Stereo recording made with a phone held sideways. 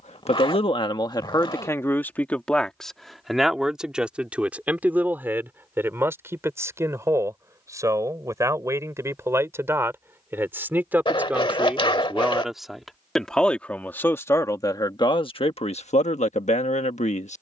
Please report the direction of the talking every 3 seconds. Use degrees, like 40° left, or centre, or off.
20° left, 10° right, 20° right, 10° right, 10° left, 40° left.